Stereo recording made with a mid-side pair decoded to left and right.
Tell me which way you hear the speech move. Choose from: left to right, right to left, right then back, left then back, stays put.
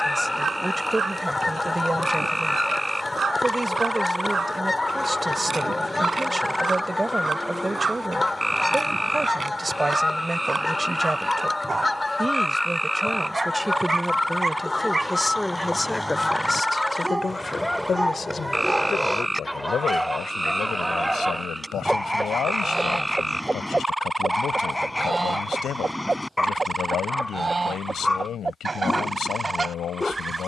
right to left.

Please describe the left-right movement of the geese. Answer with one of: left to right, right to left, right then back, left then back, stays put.
left to right.